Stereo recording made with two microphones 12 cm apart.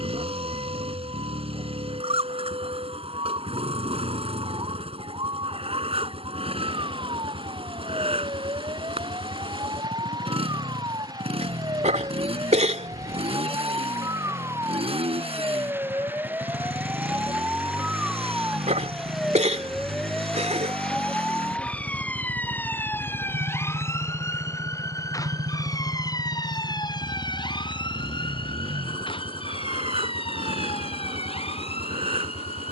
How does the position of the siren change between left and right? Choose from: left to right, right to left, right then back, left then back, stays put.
right to left.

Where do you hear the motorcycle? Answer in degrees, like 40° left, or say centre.
50° right.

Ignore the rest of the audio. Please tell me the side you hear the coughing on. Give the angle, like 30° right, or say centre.
70° right.